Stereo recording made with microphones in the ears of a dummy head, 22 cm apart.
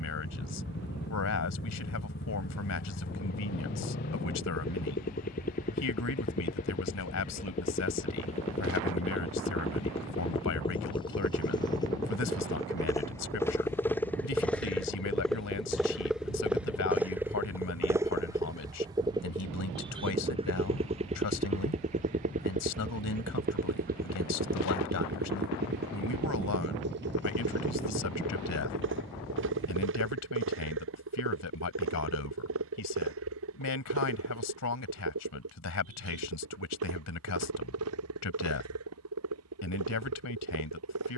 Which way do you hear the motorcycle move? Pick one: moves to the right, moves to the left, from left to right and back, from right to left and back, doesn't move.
moves to the right.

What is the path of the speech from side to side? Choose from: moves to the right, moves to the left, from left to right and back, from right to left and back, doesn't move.
doesn't move.